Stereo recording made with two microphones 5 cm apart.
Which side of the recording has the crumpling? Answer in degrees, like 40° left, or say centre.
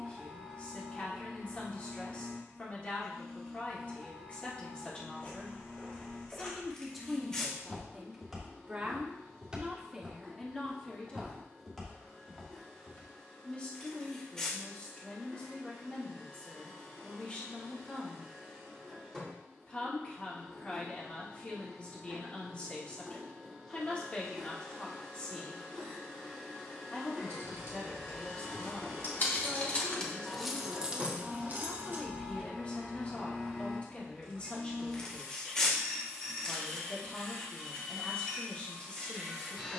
10° left.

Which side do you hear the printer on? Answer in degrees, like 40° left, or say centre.
10° left.